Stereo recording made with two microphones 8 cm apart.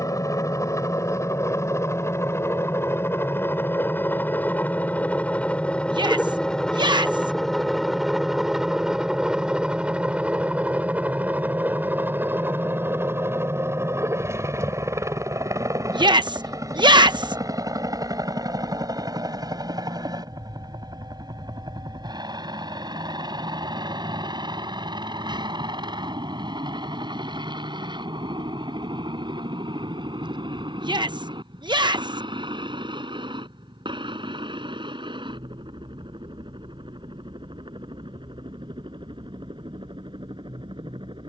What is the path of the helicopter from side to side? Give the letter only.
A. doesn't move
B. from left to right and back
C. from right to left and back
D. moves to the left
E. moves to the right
E.